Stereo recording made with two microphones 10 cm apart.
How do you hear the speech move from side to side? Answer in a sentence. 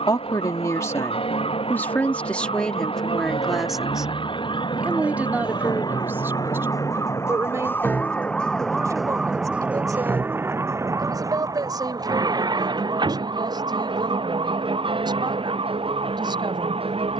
In this clip you hear the speech move to the right.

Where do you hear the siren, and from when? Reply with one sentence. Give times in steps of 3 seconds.
You can hear the siren on the left from 0 s and on the right from 9 s.